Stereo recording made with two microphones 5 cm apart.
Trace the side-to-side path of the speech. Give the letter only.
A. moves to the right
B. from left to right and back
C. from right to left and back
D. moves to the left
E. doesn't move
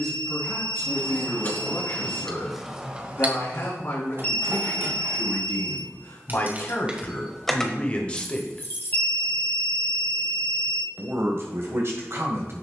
A.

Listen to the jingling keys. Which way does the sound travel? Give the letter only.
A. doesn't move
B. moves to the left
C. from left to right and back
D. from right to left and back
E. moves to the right
C.